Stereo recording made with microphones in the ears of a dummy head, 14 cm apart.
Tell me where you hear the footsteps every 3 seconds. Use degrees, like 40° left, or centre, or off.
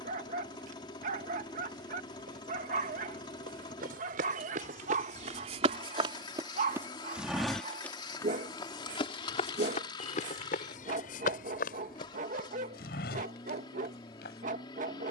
70° right, 50° right, centre, 50° left, 70° left.